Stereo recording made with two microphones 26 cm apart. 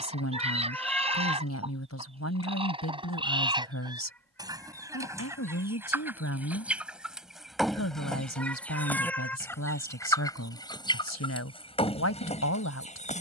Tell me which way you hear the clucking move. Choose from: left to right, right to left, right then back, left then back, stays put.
right to left.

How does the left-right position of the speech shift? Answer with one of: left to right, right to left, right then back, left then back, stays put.
stays put.